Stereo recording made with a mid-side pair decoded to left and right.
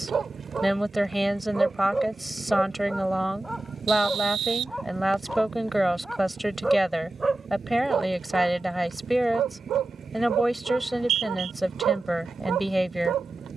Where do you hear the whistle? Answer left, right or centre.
right.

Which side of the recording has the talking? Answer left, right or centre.
centre.